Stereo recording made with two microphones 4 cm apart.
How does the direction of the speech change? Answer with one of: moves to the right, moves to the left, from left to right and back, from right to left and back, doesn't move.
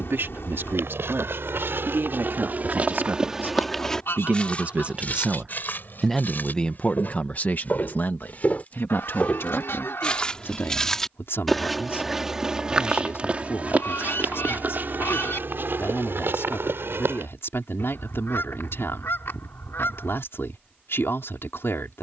moves to the left.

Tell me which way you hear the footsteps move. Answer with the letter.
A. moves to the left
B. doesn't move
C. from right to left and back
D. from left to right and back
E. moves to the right
C.